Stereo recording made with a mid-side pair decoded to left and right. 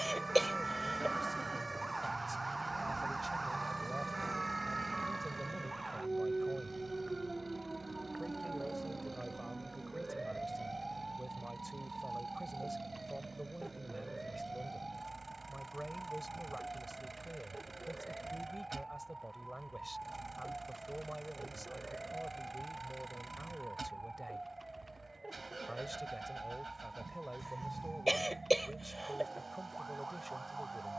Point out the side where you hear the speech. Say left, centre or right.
centre.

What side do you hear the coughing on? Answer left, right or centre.
centre.